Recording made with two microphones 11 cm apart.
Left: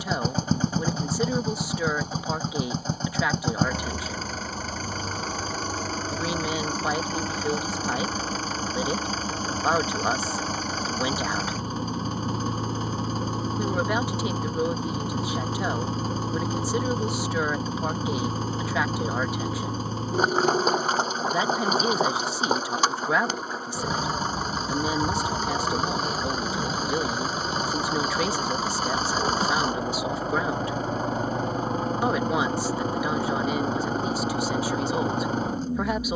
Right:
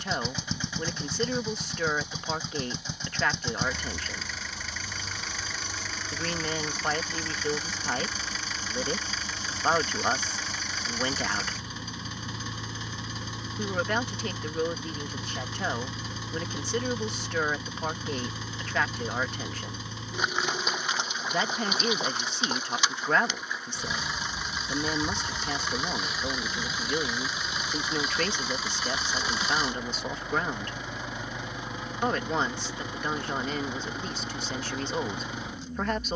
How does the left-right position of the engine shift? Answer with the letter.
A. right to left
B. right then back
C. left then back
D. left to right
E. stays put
E.